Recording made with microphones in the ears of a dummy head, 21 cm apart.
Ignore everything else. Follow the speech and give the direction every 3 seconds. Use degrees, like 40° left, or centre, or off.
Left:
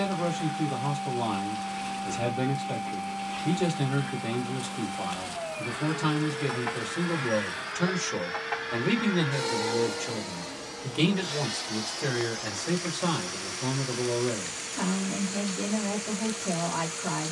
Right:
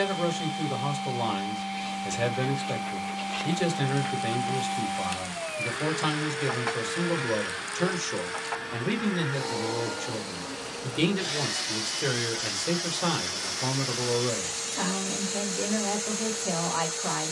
40° right, 40° right, 20° right, 10° right, 30° right, 40° right.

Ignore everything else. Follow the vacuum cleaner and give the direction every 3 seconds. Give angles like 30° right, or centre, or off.
60° right, 40° right, 10° right, 10° right, 50° right, 50° right.